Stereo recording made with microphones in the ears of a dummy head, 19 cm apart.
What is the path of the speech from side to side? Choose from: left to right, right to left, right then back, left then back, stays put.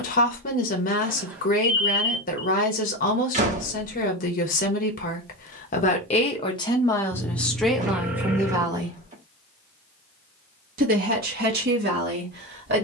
left to right.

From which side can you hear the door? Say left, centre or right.
right.